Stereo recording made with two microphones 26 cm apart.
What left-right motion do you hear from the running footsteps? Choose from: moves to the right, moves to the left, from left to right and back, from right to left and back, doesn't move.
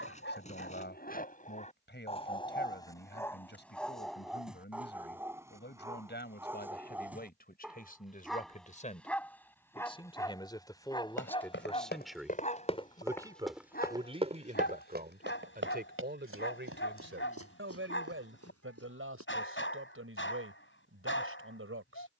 moves to the right.